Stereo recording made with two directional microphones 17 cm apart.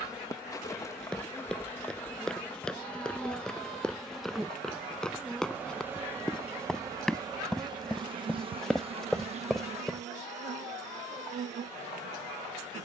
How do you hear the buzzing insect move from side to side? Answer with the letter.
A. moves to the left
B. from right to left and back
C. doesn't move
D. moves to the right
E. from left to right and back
D.